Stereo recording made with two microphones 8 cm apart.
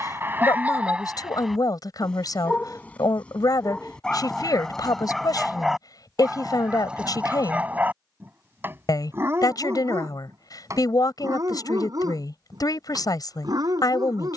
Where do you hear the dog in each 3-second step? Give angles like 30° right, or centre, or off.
10° right, 10° left, 20° right, 40° right, 50° right.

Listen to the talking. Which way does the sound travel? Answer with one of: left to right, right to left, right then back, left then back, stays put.
stays put.